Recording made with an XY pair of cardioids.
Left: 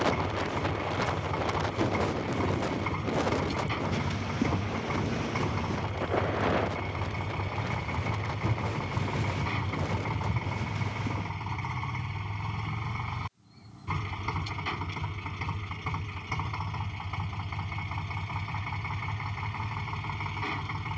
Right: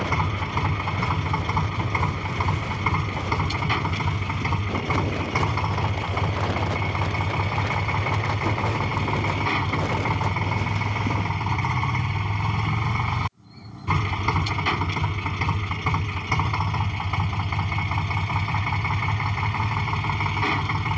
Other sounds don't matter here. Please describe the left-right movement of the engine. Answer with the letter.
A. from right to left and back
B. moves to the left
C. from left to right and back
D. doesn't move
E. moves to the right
D.